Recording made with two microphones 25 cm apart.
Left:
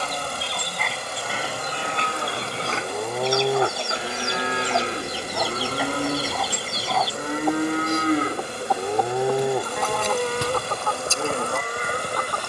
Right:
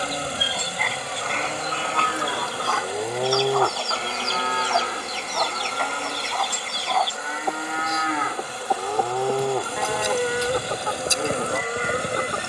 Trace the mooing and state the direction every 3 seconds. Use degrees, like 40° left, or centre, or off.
20° right, 20° left, 50° left, 10° right.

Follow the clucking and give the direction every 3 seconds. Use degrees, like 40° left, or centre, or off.
10° left, 10° left, centre, 20° right.